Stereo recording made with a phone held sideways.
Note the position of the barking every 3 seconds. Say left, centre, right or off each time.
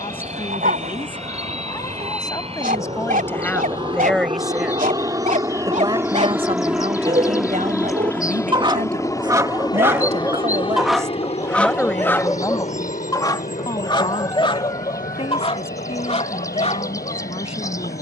right, right, right, centre, left, left.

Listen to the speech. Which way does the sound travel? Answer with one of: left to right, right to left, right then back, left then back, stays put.
right then back.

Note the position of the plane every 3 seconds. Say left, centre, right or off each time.
right, right, centre, left, left, left.